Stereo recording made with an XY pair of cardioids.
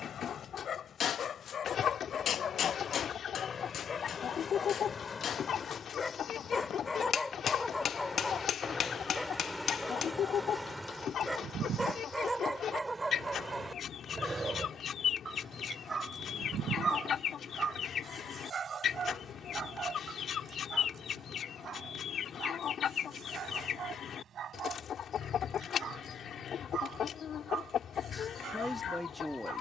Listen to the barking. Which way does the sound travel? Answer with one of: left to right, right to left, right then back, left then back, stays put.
left to right.